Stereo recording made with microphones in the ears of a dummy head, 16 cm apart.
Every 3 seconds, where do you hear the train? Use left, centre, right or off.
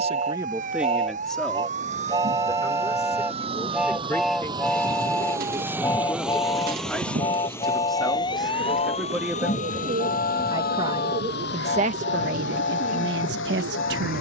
right, centre, left, left, left.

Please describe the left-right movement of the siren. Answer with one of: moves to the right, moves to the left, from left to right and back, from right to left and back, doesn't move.
moves to the left.